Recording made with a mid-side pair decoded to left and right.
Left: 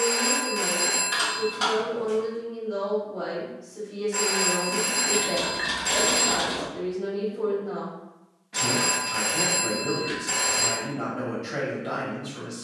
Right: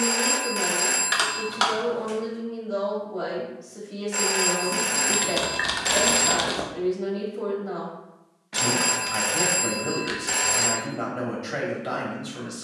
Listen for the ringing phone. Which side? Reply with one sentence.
You can hear the ringing phone on the right.